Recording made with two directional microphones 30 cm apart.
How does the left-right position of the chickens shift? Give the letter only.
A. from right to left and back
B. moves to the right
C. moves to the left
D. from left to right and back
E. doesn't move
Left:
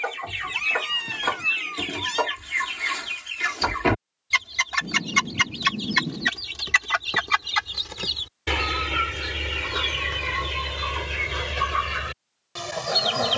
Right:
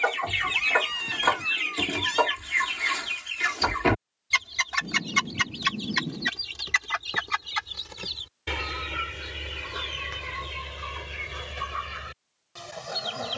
C.